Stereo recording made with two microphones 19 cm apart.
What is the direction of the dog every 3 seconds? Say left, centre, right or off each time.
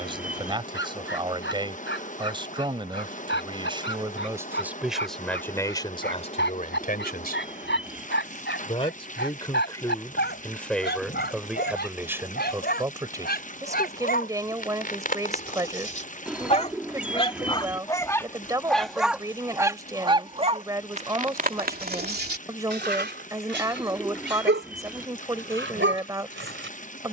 left, left, left, left, left, left, centre, right, right.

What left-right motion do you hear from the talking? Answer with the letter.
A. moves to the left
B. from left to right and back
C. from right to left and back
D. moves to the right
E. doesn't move
C.